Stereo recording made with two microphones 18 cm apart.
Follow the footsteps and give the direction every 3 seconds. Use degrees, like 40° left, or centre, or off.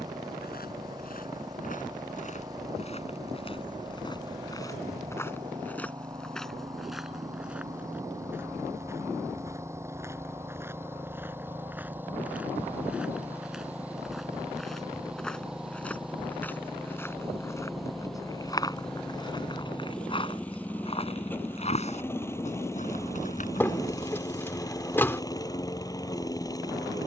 50° left, 20° left, 10° right, 10° right, centre, 10° left, 20° left, 40° left, off.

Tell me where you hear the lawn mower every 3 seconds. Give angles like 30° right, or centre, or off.
20° right, 20° right, 20° right, 10° right, 10° right, centre, 10° left, 10° left, 20° left.